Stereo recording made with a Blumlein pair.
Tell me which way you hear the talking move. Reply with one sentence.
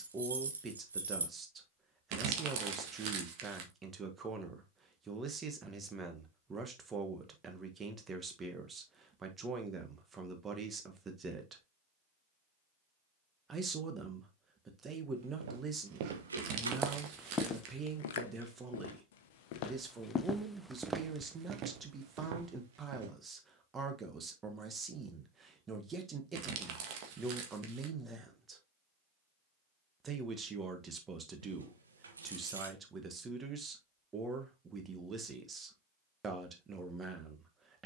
You can hear the talking stay in one place.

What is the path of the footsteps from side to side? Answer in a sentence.
In this clip you hear the footsteps move from right to left and back again.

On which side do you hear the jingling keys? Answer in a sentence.
In this clip you hear the jingling keys on the right.